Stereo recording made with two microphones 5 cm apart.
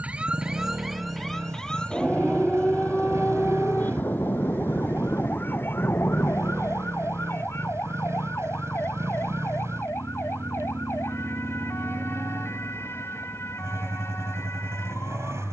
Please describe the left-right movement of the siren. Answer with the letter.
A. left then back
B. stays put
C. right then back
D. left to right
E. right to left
E.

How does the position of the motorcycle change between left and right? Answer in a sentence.
In this clip you hear the motorcycle stay in one place.